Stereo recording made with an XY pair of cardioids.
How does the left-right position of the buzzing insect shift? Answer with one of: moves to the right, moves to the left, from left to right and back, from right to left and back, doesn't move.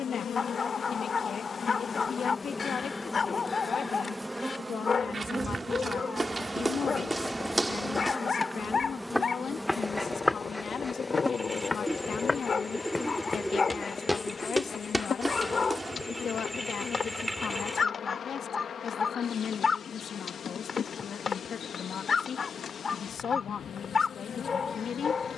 from left to right and back.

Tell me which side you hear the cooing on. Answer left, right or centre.
centre.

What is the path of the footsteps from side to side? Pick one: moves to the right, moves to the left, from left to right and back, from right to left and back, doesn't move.
from right to left and back.